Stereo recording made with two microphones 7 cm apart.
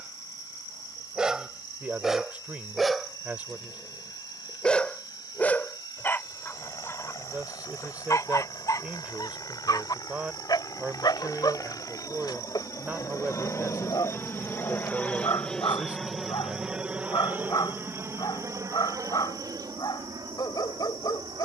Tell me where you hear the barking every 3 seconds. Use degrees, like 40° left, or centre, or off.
10° right, 10° left, 40° left, 70° left, 70° left, 70° left, 70° left.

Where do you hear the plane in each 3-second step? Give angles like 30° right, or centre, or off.
80° left, 80° left, 70° left, 60° left, 40° left, 10° right, 50° right.